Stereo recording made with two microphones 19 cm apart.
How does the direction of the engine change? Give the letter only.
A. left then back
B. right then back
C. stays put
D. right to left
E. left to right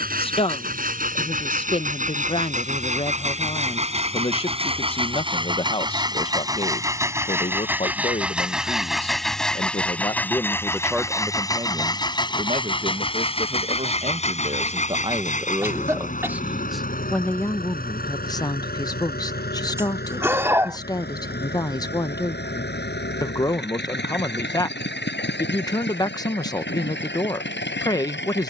D.